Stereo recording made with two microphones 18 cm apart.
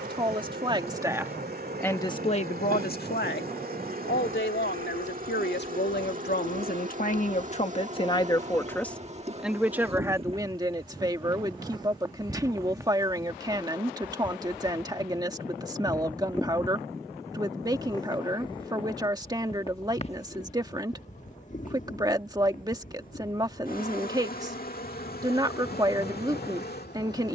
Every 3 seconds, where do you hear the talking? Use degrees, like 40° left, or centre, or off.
10° left, 70° left, 40° left, 20° right, 20° right, 20° right, 20° right, 20° right, 20° right.